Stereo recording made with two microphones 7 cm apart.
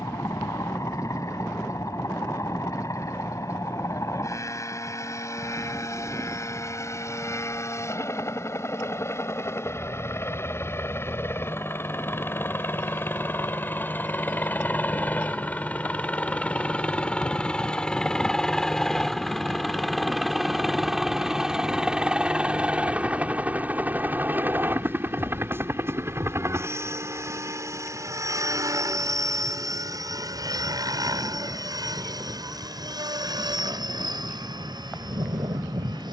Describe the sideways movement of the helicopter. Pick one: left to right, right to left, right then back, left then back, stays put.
left to right.